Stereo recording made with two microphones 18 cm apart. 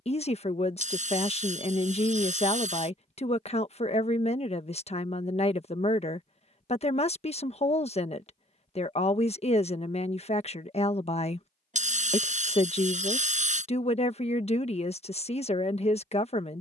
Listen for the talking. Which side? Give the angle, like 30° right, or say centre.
40° left.